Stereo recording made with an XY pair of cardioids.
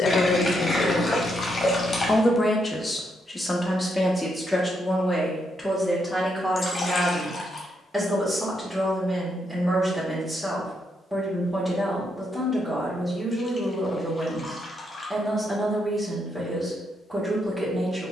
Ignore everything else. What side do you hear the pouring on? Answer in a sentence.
In this clip you hear the pouring on the left.